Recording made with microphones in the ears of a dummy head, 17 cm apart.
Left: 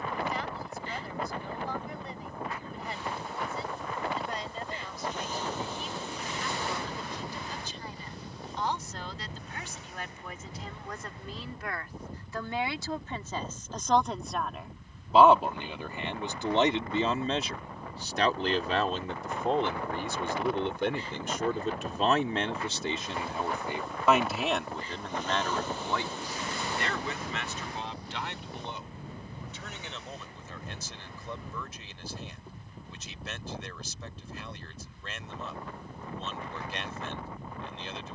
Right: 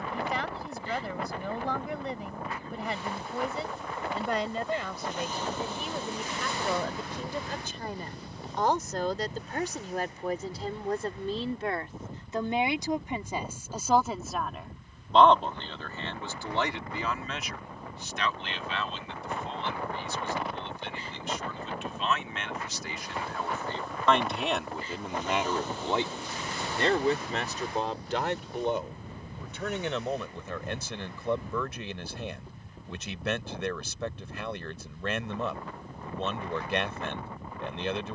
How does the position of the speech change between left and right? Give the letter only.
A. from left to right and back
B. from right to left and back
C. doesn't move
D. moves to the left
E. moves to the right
B.